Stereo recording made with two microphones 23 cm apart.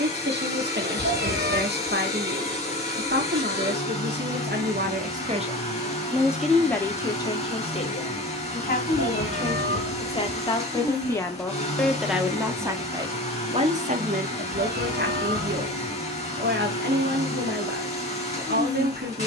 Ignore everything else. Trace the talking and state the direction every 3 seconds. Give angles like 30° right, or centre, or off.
50° right, 40° right, 20° left, 20° left, 30° right, 50° right, 50° right.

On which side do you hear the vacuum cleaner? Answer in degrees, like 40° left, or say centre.
30° left.